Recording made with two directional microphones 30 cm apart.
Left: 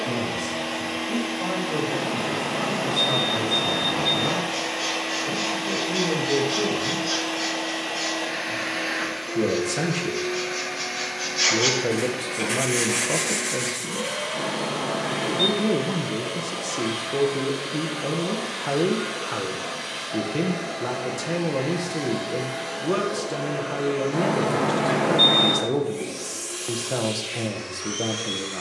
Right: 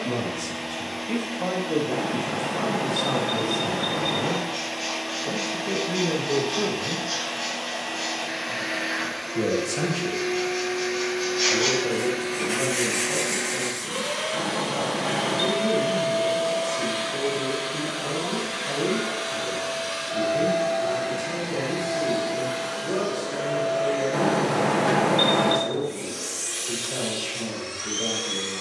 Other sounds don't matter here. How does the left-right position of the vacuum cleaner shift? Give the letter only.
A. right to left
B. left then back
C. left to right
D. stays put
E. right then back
C.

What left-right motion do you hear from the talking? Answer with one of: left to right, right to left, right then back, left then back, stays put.
right to left.